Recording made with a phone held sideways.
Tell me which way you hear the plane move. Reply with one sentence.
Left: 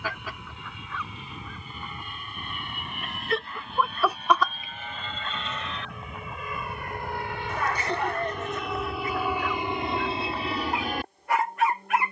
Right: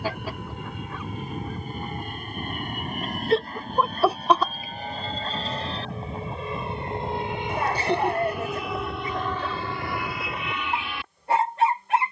In this clip you hear the plane travel towards the left.